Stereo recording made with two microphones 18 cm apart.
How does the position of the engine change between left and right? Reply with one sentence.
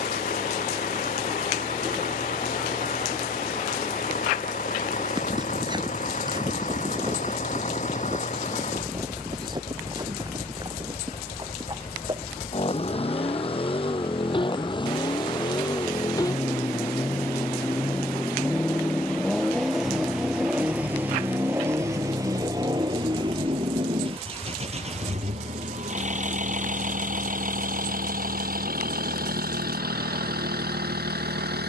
You can hear the engine move from left to right.